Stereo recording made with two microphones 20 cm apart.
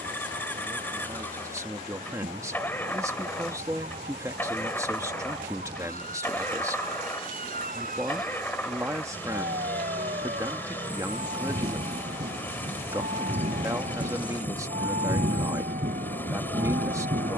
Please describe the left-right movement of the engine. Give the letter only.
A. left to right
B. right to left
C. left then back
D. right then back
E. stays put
E.